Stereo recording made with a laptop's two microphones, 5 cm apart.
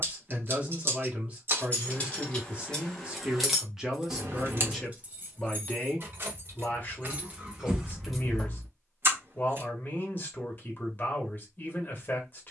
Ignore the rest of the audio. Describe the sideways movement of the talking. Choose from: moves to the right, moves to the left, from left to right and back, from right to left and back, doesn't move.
moves to the left.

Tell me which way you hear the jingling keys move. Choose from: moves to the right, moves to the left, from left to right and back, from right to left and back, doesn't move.
from left to right and back.